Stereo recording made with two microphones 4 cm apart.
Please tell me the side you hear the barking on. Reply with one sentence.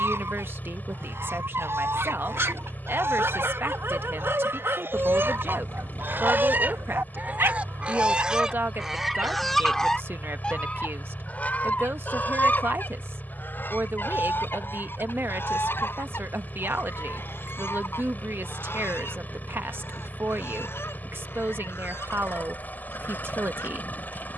In this clip you hear the barking on the right.